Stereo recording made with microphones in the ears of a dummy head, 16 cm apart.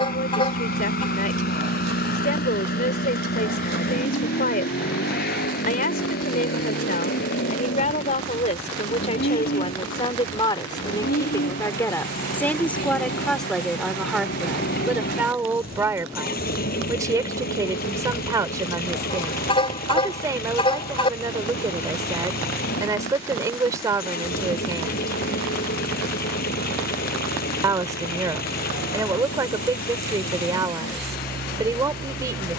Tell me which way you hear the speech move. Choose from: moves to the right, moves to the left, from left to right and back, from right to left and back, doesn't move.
moves to the right.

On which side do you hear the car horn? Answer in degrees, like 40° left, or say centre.
30° left.